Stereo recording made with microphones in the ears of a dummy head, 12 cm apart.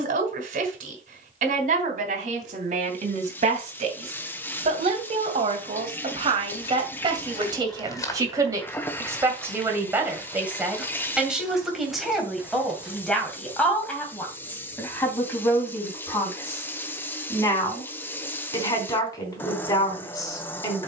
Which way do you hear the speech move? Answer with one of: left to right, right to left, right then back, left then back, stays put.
right to left.